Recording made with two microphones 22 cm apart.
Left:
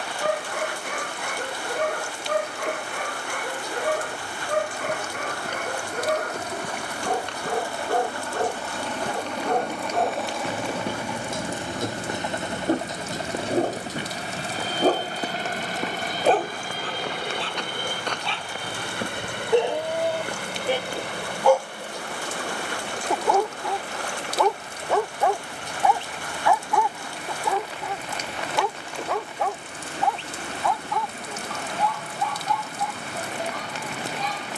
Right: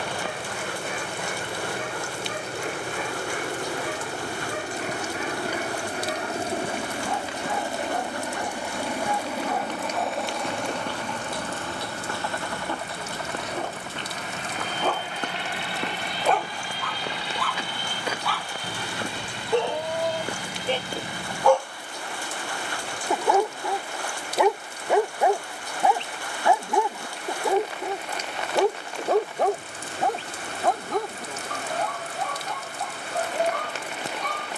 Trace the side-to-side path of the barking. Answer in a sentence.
In this clip you hear the barking travel towards the right.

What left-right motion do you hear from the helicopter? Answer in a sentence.
You can hear the helicopter go from the right side to the left.